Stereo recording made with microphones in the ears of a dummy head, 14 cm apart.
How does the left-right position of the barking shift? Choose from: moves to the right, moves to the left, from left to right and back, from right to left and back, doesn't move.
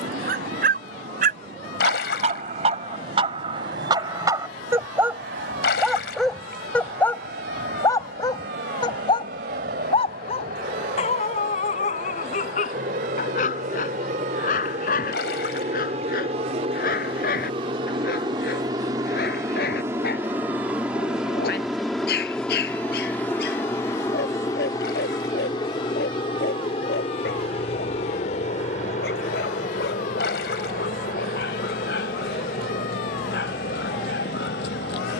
moves to the left.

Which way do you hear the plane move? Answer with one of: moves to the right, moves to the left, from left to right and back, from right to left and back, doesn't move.
moves to the left.